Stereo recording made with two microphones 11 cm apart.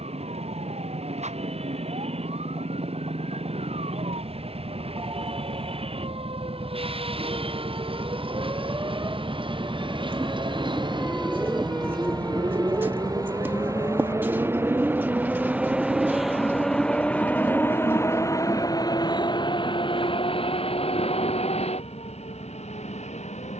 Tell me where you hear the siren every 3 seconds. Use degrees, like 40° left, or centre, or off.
80° right, 70° right, 40° right, 10° right, 20° left, 40° left, 50° left, 60° left.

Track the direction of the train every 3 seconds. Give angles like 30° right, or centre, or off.
60° right, 60° right, 50° right, 50° right, 30° right, centre, 40° left, 60° left.